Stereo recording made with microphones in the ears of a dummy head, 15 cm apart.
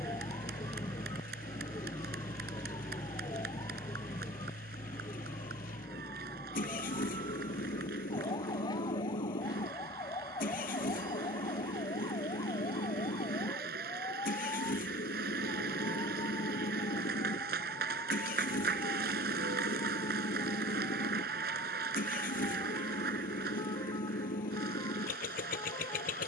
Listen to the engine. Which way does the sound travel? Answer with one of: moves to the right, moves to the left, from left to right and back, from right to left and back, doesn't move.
doesn't move.